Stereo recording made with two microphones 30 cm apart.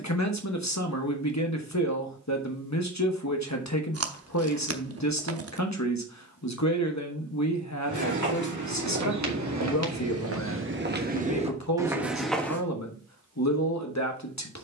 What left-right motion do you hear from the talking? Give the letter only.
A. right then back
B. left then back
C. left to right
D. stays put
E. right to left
D.